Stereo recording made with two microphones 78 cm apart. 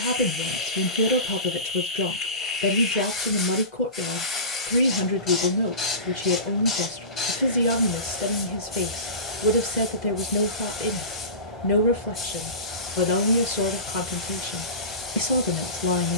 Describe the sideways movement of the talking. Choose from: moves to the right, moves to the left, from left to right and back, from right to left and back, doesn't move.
doesn't move.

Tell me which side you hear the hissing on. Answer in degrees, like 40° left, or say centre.
40° left.